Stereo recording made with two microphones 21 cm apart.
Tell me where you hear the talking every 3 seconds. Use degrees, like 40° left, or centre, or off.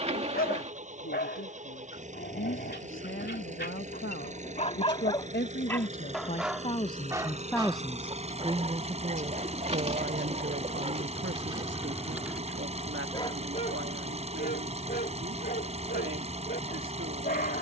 70° left, 60° left, 10° left, 50° right, 70° right, 70° right.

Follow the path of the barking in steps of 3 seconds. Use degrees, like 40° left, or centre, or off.
50° left, 40° left, 20° right, 30° right, 30° left, 40° left.